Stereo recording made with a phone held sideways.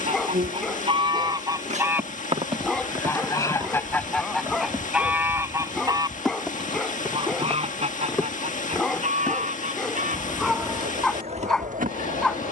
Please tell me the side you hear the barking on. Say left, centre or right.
centre.